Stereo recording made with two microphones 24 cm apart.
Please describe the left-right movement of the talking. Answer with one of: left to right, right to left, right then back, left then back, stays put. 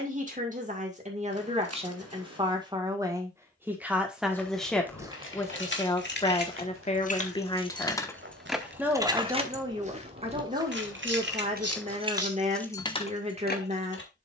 left then back.